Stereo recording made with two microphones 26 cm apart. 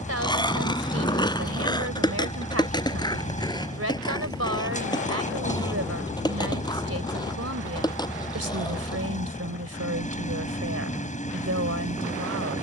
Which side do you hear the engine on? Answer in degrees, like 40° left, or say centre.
30° left.